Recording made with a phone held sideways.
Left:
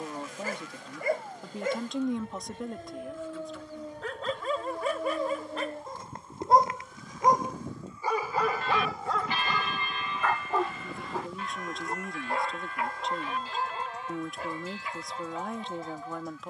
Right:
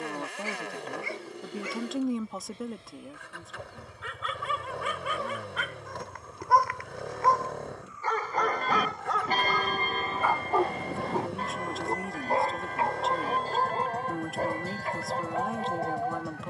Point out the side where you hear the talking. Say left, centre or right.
centre.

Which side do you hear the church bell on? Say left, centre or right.
right.